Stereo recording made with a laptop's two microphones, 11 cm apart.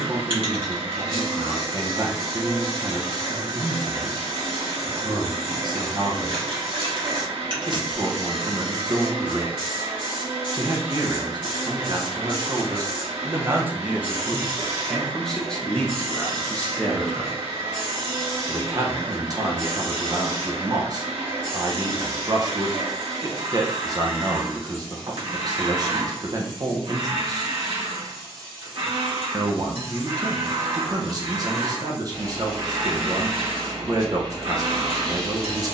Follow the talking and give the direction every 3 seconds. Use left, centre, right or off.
right, right, right, right, right, centre, right, right, right, right, right, right.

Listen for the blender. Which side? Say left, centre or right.
right.